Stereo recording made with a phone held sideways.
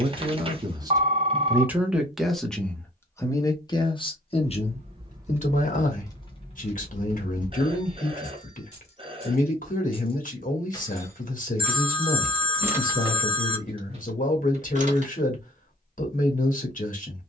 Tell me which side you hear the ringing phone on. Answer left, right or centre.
right.